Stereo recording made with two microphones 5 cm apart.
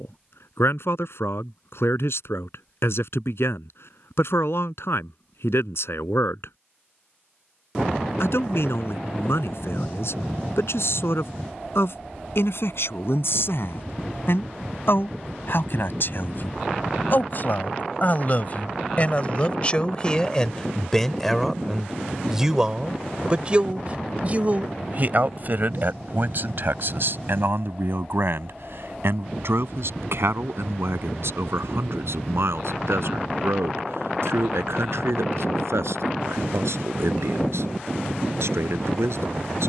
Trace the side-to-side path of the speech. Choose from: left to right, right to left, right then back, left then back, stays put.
left to right.